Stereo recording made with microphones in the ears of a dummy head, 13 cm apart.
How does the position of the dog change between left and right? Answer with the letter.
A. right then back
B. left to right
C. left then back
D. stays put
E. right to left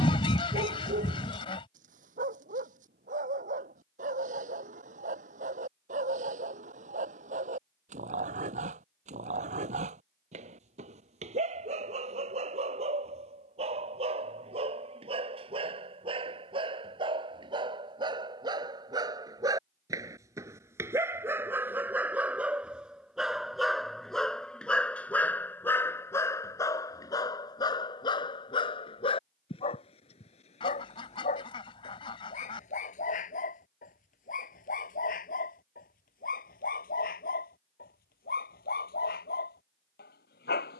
E.